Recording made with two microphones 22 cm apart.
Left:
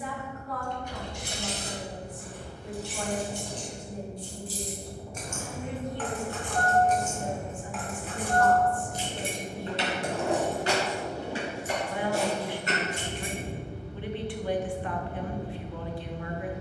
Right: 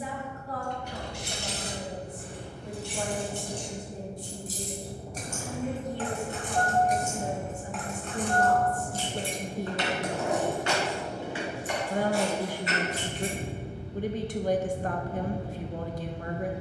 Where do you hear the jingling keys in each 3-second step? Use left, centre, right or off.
right, right, centre, left, left, off.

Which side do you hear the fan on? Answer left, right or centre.
right.